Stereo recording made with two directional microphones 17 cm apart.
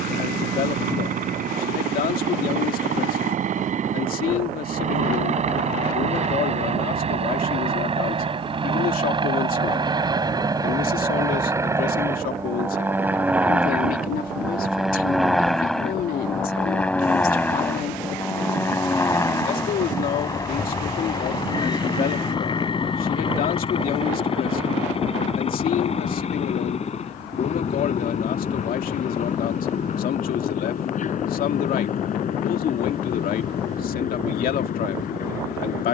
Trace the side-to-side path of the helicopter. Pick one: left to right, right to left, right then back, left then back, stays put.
right to left.